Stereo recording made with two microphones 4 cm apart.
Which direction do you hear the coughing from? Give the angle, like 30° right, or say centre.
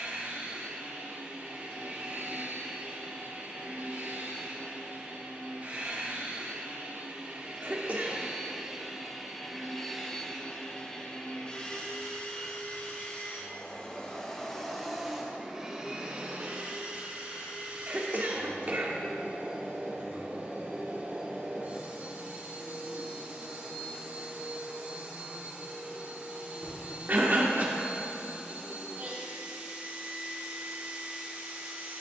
40° right.